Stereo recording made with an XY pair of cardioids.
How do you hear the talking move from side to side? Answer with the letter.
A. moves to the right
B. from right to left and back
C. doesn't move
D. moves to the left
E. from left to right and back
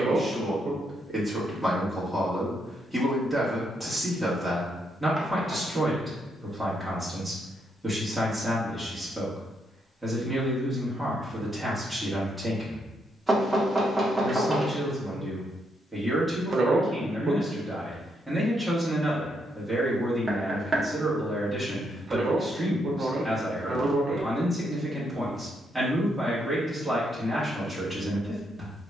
C.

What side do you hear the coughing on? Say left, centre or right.
right.